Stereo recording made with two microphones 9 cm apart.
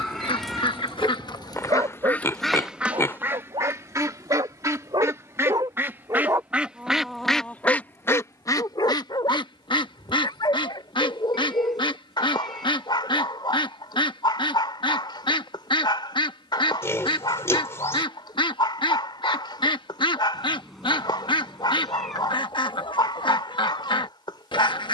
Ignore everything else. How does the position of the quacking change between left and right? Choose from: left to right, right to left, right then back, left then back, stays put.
right then back.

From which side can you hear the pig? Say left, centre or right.
left.